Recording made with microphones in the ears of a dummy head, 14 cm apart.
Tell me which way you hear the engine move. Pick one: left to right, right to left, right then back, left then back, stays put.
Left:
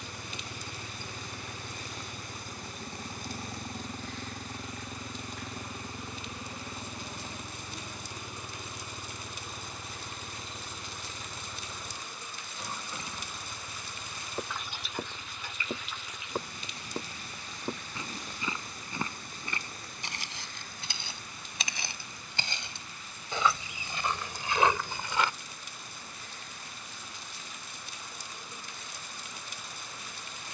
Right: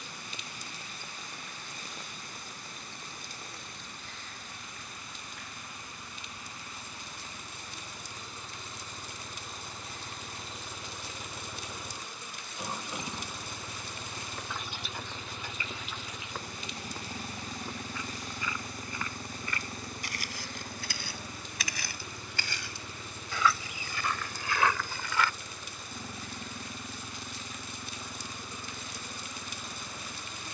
left to right.